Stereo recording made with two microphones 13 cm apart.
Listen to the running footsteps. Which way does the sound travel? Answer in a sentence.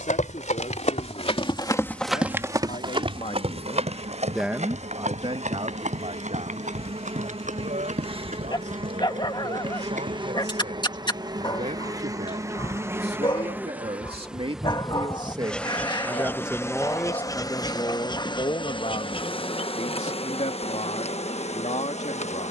You can hear the running footsteps move to the right.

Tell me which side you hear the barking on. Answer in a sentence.
You can hear the barking on the left.